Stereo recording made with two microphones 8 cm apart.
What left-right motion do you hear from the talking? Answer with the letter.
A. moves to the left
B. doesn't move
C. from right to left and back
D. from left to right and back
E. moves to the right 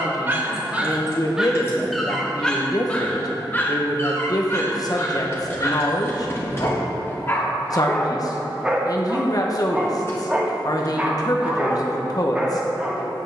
B.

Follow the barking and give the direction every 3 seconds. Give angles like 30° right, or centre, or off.
10° right, 30° left, 20° left, 10° right, 10° right.